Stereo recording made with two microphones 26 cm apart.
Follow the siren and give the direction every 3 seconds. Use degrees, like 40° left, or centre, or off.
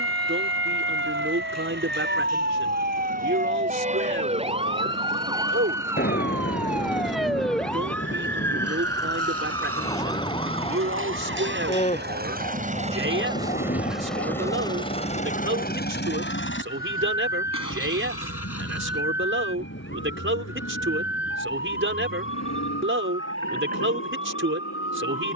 40° right, 20° right, centre, 20° left, 30° left, 40° left, 40° left, 50° left, 50° left.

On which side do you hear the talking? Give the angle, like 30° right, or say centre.
50° right.